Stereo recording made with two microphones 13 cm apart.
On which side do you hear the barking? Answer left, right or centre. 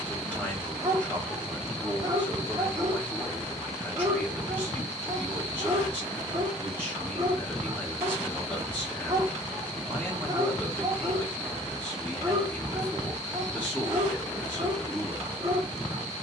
right.